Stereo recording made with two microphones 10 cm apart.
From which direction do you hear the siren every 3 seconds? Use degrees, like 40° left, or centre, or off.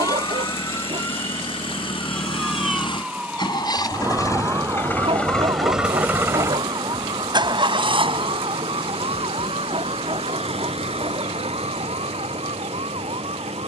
10° left, 30° right, 50° right, 60° right, 70° right.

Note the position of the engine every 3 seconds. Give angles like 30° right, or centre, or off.
60° left, 20° left, 50° right, 70° right, 80° right.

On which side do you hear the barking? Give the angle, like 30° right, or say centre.
80° right.